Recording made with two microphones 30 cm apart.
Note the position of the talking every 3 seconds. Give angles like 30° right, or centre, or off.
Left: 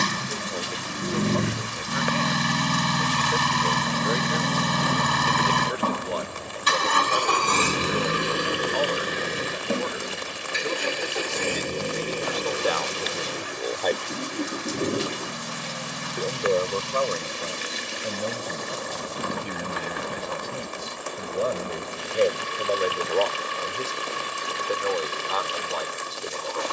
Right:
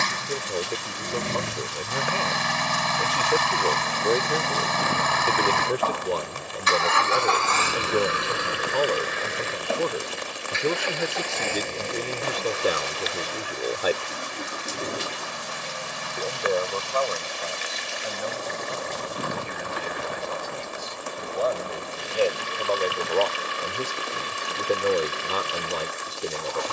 50° right, 50° right, 50° right, 50° right, 20° right, 30° left, 40° left, 10° left, 30° right.